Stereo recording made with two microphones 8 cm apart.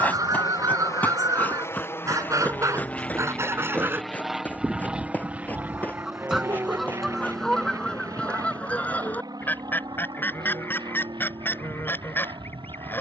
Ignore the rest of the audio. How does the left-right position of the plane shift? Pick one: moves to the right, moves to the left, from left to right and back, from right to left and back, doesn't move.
moves to the right.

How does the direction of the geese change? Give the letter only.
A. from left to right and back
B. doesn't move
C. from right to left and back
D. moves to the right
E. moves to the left
E.